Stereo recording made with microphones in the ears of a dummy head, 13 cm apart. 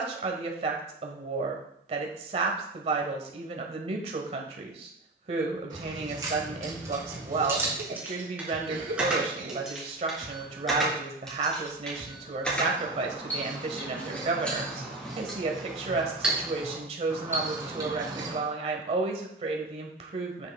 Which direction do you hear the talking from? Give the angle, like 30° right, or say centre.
50° right.